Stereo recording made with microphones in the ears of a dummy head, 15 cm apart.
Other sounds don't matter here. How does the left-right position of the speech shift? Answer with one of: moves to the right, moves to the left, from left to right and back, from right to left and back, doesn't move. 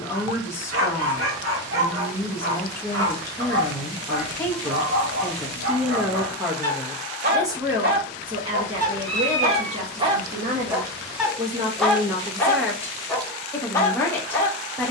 from left to right and back.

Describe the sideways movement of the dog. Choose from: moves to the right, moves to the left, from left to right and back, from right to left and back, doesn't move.
moves to the left.